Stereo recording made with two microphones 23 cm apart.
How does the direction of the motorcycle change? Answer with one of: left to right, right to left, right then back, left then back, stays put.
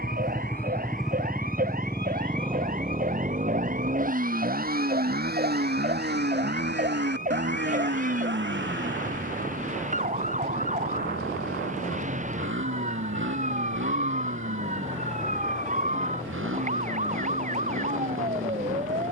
left to right.